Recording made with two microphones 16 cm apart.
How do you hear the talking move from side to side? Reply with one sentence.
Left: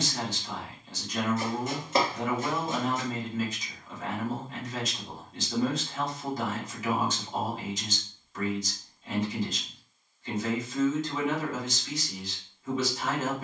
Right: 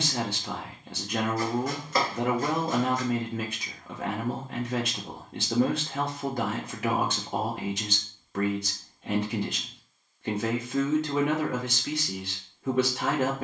You can hear the talking stay put.